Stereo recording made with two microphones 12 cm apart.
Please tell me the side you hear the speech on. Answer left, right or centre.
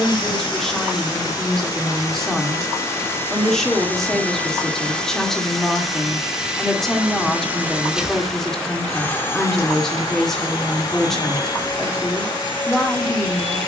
centre.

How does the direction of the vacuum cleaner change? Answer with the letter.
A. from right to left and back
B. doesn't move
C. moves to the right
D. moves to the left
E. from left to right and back
E.